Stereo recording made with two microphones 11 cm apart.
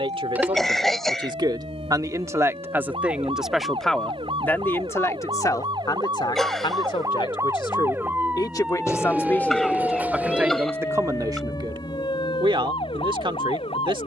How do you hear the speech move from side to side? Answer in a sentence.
You can hear the speech move from right to left and back again.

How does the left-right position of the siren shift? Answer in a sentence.
You can hear the siren move to the left.